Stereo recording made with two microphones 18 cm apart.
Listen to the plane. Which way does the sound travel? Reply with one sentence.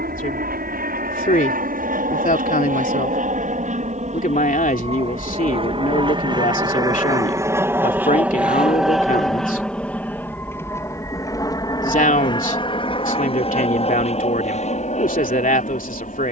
In this clip you hear the plane move to the left.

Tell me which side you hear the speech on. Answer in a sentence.
In this clip you hear the speech on the left.